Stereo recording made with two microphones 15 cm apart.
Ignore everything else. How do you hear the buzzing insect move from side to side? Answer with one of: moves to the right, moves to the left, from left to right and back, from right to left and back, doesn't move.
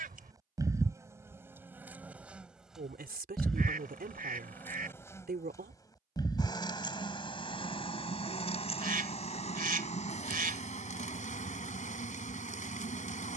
moves to the left.